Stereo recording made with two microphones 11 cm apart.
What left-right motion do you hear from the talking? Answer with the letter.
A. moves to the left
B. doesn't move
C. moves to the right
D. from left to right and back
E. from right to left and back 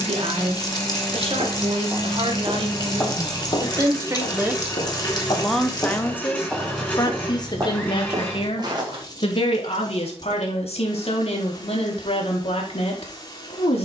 A.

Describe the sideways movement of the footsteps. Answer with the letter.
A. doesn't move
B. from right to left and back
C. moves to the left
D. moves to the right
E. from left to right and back
B.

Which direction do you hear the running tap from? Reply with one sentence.
You can hear the running tap on the left.